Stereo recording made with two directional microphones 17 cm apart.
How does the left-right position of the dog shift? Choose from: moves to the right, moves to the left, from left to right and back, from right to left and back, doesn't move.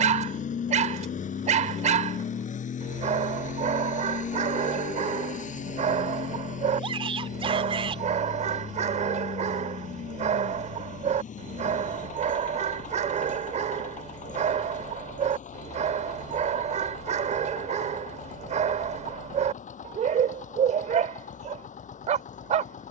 doesn't move.